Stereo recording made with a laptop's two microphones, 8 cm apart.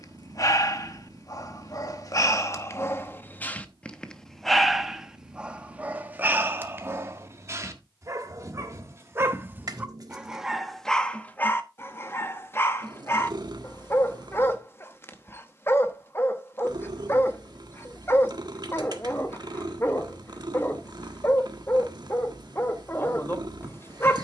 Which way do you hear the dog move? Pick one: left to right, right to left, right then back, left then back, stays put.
right then back.